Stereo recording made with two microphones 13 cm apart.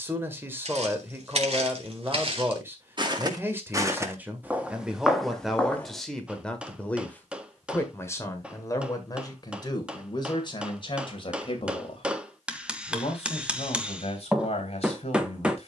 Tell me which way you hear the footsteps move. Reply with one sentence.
In this clip you hear the footsteps move to the left.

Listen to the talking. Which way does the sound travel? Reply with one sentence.
You can hear the talking move to the left.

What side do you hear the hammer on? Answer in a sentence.
In this clip you hear the hammer in the centre.